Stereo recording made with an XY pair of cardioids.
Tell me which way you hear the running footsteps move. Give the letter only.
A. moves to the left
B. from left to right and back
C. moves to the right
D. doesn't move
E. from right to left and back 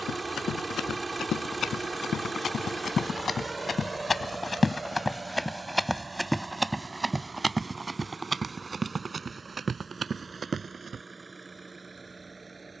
C.